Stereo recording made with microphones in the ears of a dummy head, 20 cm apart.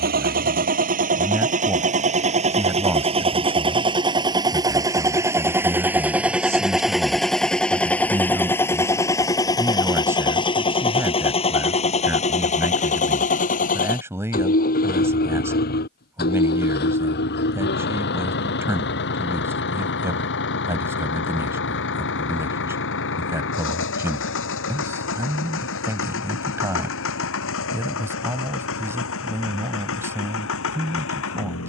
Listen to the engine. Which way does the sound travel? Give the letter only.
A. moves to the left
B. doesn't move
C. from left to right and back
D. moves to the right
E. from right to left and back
A.